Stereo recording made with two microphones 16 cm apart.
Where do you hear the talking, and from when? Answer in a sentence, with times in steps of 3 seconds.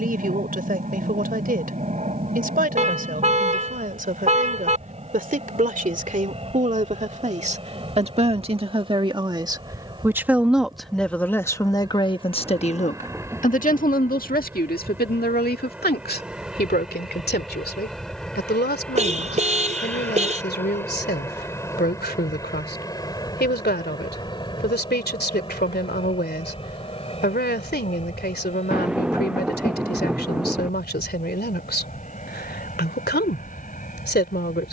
You can hear the talking on the right from 0 s, in the centre from 9 s and on the left from 12 s.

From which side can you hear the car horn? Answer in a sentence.
In this clip you hear the car horn on the right.